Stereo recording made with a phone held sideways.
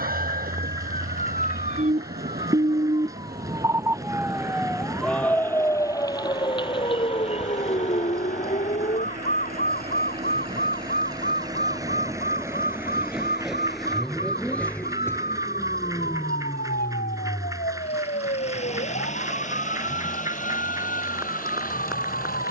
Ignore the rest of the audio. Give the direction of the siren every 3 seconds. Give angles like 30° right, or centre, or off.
50° right, centre, 40° left, 50° left, 60° left, 70° left, 70° left, off.